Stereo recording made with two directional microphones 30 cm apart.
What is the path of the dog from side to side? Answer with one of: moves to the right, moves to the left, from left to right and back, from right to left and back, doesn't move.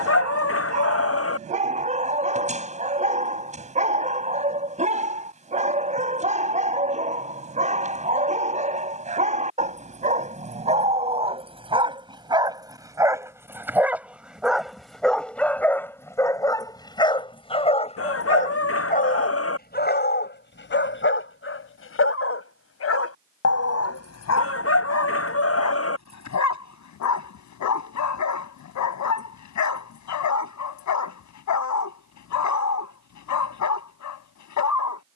moves to the left.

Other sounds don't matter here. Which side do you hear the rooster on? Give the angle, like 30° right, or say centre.
50° left.